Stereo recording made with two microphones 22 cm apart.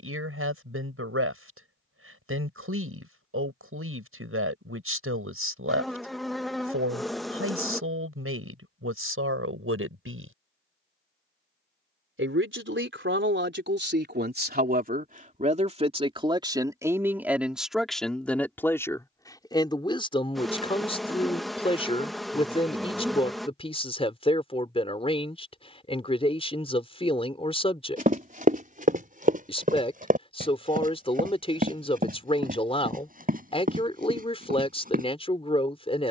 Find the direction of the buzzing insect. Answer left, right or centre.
centre.